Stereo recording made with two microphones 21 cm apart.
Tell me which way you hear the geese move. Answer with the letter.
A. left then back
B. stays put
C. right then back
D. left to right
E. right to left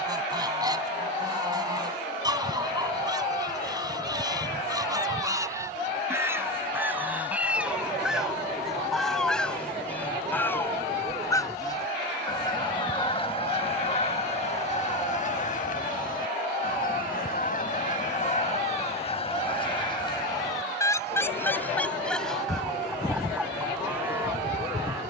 A.